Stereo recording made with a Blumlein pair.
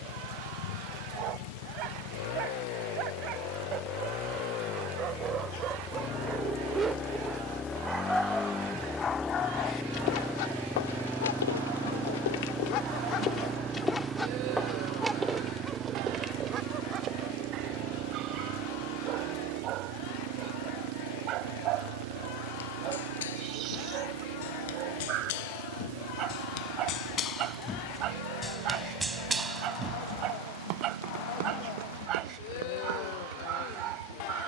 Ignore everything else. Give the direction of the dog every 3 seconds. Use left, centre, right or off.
right, right, centre, left, left, right, right, right, right, right, right, right.